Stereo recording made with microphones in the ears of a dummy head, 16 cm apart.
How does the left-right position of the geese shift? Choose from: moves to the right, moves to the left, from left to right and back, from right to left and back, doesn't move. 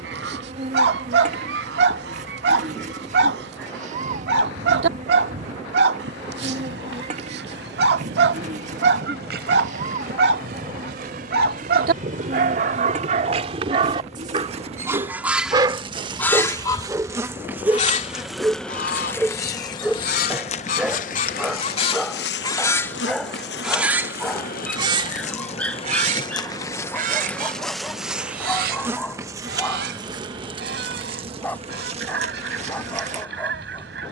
from right to left and back.